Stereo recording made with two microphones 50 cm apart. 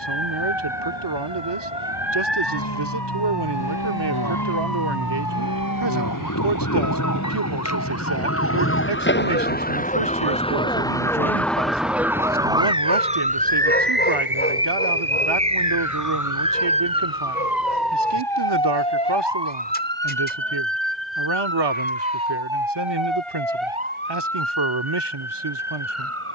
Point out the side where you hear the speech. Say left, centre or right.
right.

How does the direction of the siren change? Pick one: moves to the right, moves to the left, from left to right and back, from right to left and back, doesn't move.
moves to the right.